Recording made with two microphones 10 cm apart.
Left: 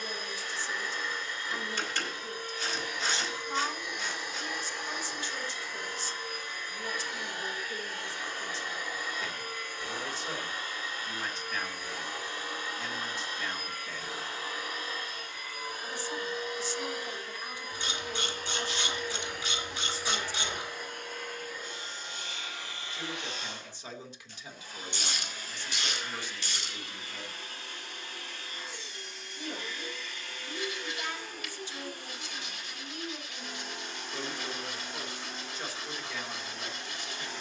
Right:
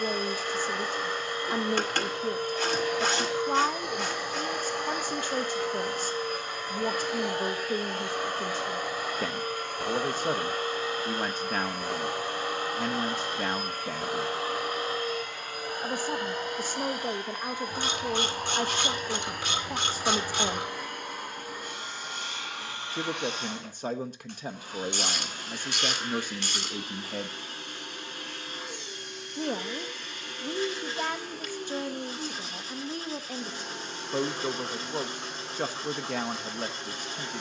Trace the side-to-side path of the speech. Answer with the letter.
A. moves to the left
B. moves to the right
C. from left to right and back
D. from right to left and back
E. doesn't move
E.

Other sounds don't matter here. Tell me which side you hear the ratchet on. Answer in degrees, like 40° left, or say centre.
70° right.